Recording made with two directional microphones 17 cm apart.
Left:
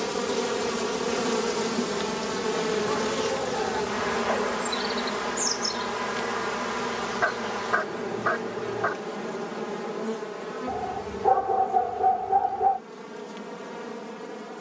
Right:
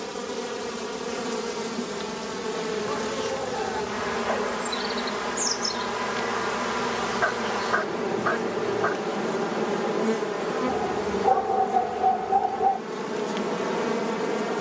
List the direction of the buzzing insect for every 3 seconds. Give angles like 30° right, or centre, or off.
20° left, centre, 20° right, 40° right, 60° right.